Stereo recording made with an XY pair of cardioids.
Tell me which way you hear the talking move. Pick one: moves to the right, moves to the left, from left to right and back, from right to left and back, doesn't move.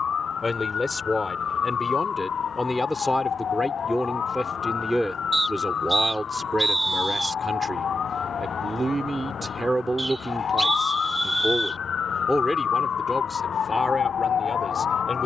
from left to right and back.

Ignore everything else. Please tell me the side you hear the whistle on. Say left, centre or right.
centre.